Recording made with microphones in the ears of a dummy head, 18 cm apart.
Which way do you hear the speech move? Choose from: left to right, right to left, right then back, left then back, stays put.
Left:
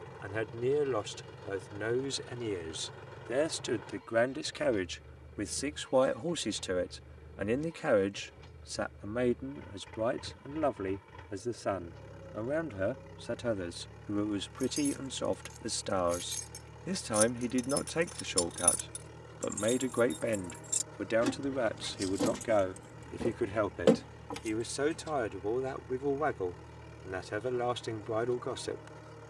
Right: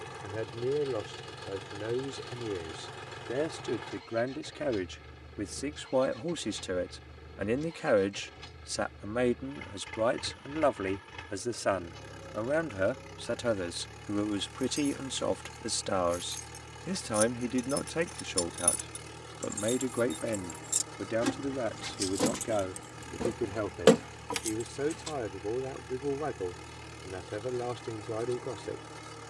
right then back.